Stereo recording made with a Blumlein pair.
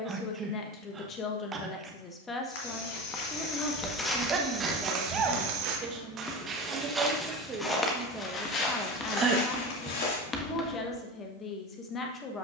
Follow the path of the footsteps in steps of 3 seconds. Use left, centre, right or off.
left, centre, centre, left.